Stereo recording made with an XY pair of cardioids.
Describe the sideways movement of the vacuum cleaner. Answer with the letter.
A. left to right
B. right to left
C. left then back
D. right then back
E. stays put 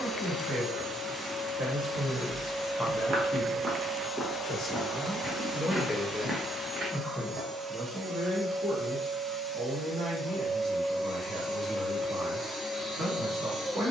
D.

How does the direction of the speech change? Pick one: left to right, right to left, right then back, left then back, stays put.
left then back.